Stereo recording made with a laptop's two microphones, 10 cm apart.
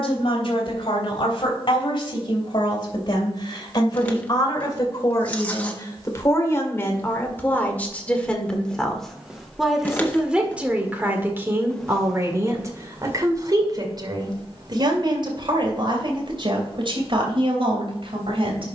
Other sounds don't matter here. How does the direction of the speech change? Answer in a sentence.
You can hear the speech move to the right.